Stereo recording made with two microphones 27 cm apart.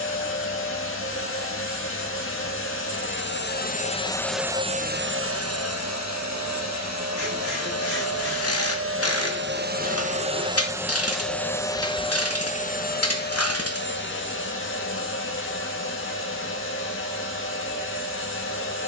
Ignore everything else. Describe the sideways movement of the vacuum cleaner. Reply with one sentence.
In this clip you hear the vacuum cleaner move from left to right and back again.